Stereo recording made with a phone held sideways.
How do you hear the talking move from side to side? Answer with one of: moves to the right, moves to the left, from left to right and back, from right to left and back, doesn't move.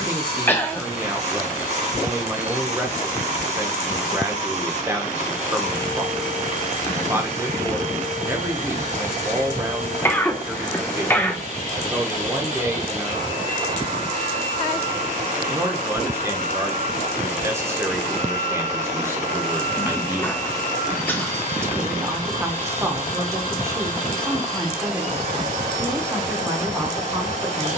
doesn't move.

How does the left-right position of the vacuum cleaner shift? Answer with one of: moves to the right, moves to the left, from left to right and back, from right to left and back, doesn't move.
doesn't move.